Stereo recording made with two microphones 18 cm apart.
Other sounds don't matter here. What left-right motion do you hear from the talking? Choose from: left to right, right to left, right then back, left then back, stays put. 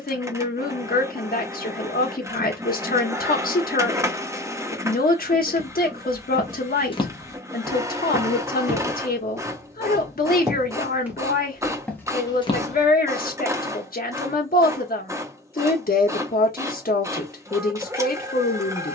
stays put.